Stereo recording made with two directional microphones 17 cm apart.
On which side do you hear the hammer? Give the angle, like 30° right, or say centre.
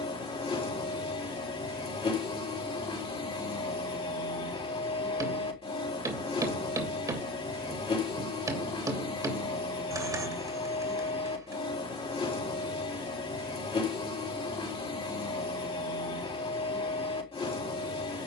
20° right.